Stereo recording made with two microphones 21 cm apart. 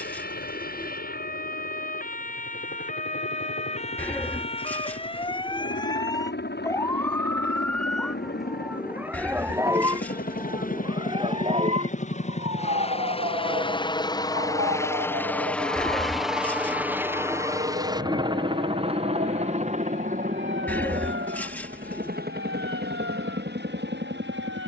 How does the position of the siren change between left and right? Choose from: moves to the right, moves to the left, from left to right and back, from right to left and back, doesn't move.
moves to the right.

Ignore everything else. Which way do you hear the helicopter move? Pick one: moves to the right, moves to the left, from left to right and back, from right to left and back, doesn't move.
moves to the right.